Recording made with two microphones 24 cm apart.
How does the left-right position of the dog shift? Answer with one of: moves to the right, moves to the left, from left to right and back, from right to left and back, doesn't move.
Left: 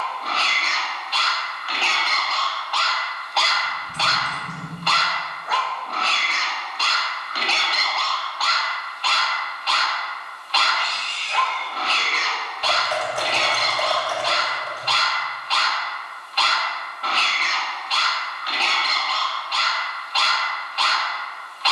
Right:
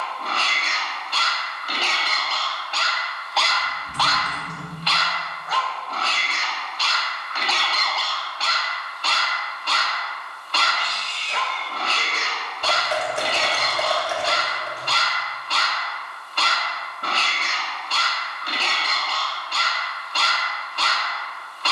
from right to left and back.